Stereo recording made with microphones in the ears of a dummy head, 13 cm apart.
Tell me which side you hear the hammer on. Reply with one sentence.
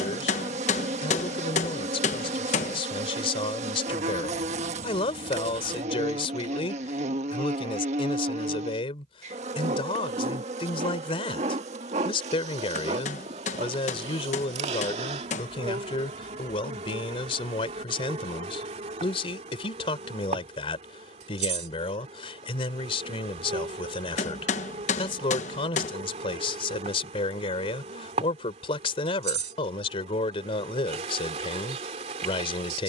You can hear the hammer on the left.